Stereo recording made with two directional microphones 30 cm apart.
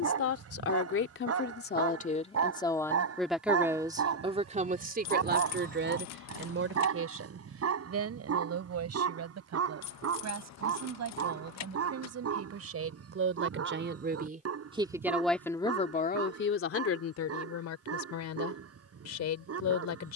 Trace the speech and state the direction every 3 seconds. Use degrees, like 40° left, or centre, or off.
30° left, 20° right, 50° right, 60° right, 40° right, 40° left, 60° left.